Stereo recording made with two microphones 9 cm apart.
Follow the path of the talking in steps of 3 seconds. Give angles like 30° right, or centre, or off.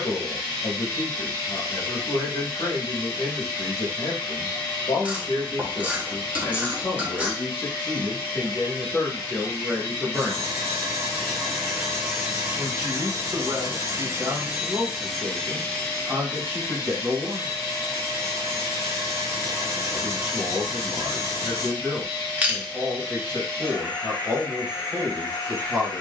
60° left, 60° left, 30° left, centre, 20° right, 20° right, 20° right, 20° right, 20° right.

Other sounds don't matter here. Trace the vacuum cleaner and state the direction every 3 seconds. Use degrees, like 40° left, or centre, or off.
50° left, 50° left, 50° left, 20° left, 20° right, 30° left, 50° left, 50° left, 50° left.